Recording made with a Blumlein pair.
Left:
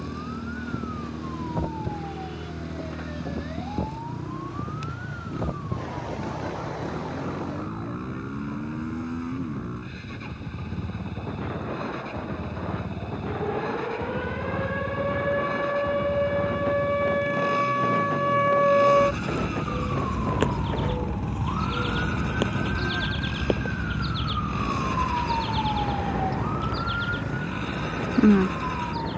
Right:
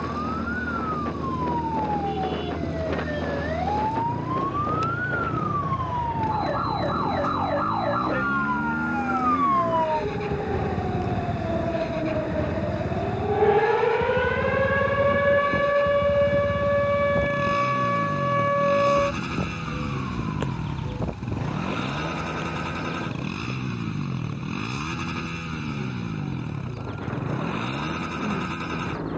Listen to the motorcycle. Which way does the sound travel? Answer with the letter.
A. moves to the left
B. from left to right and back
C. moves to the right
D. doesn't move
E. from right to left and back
D.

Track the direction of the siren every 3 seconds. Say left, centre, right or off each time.
right, right, right, right, right, centre, centre, left, left, left.